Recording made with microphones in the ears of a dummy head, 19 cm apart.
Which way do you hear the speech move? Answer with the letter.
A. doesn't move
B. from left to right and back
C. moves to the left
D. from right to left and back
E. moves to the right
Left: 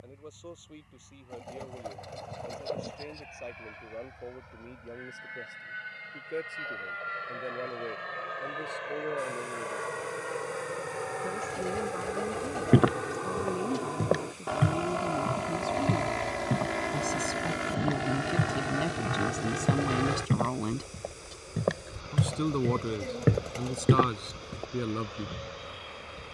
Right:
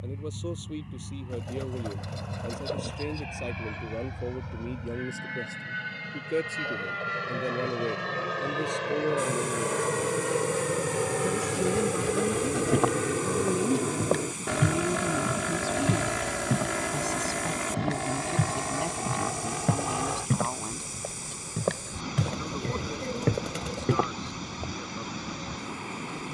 C.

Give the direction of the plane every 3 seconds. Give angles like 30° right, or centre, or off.
80° right, 70° right, 70° right, 60° right, 40° right, 10° right, 20° left, 30° left, 50° left.